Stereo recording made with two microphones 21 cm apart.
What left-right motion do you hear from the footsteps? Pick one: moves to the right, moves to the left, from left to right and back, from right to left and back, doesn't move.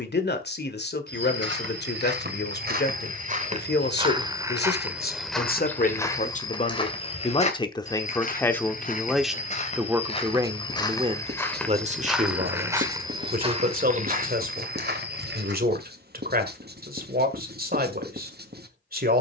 from right to left and back.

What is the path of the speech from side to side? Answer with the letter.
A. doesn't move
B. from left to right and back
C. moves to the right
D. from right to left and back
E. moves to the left
C.